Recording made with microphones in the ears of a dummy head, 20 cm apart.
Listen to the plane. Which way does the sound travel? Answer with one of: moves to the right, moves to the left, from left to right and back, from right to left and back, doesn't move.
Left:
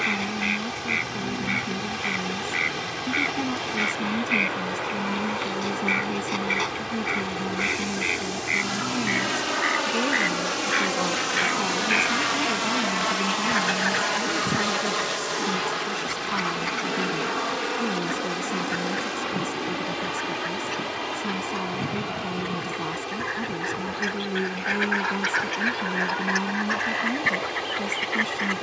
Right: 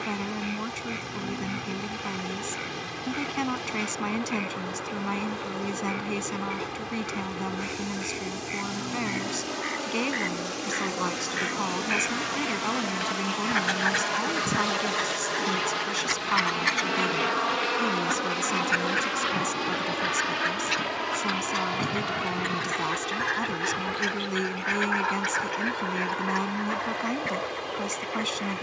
moves to the right.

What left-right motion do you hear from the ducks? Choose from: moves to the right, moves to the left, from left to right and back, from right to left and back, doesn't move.
from left to right and back.